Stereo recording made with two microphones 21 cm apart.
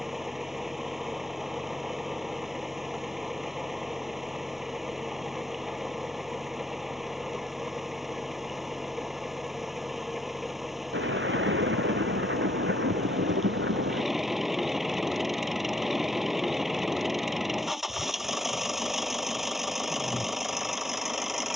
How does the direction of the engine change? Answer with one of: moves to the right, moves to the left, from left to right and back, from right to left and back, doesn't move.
doesn't move.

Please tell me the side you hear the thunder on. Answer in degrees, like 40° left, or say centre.
60° right.